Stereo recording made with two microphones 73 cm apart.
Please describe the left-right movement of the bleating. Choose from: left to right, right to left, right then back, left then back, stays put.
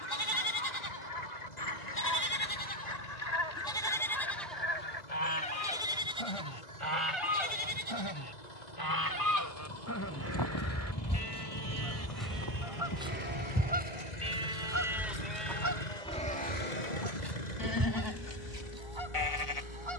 right then back.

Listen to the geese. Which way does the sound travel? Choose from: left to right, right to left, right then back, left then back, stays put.
left to right.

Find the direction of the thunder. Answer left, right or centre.
left.